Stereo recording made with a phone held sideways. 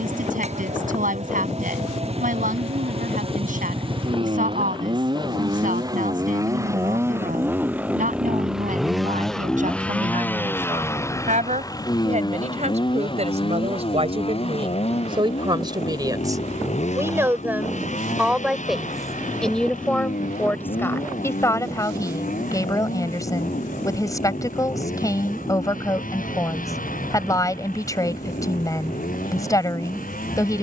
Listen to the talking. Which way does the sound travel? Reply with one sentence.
In this clip you hear the talking move from right to left.